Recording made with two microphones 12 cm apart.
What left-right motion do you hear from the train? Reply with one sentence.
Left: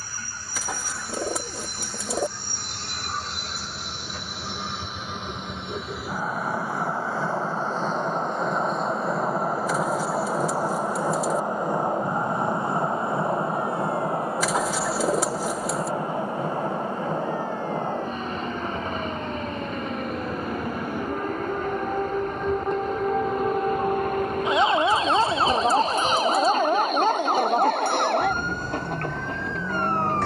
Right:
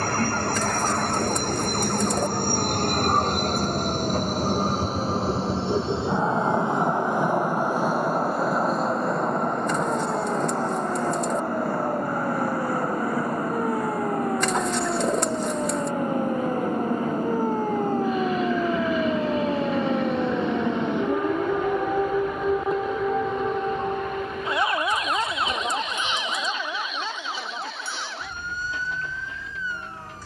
You can hear the train move from right to left.